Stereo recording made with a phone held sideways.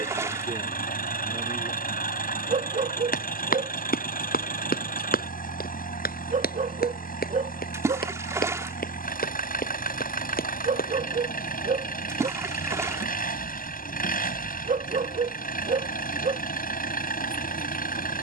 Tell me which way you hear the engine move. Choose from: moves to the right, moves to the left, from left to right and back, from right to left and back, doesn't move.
doesn't move.